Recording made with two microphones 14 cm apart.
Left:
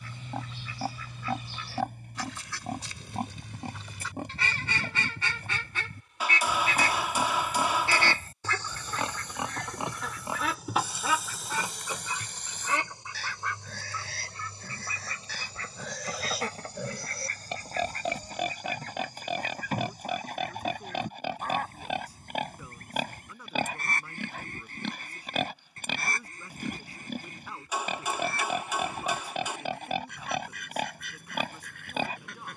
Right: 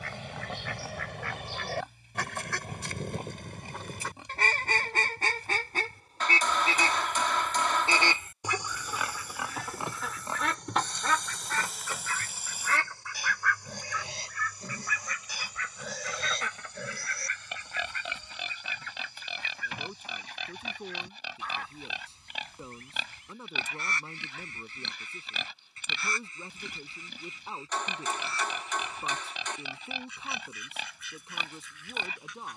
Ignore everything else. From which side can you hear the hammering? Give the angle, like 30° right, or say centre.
10° left.